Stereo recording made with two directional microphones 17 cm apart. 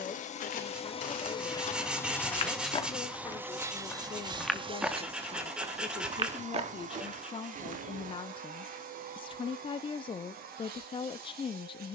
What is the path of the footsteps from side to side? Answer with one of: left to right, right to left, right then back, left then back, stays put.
left to right.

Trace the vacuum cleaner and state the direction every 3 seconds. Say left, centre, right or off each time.
left, right, right, right.